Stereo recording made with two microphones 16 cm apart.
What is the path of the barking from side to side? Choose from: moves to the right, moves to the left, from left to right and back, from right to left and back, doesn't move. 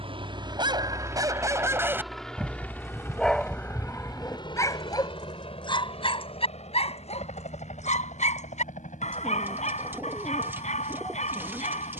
moves to the left.